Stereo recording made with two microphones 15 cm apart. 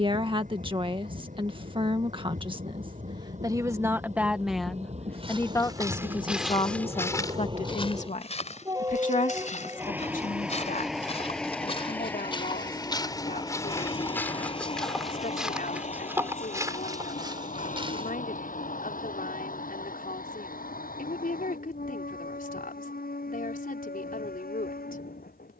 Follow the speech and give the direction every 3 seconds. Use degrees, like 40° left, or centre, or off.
30° right, centre, 40° left, 60° left, 70° left, 70° left, 70° left, 70° left, 70° left.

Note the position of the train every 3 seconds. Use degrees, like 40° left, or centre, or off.
60° right, 50° right, 30° right, 10° right, 30° left, 50° left, 60° left, 70° left, 80° left.